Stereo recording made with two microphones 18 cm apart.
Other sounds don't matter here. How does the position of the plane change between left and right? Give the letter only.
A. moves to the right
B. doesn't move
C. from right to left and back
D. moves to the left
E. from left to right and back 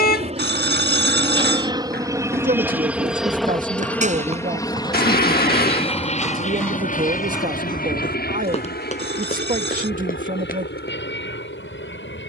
D.